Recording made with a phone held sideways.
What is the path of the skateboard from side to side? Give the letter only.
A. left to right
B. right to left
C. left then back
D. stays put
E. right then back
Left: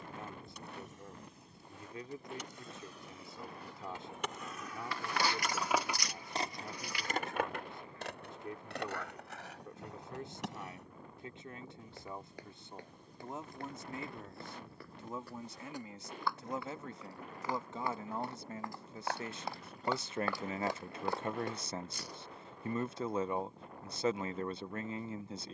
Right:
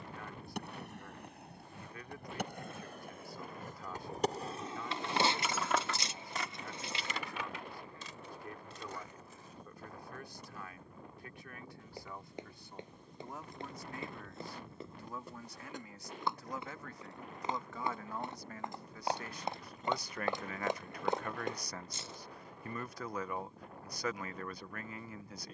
B.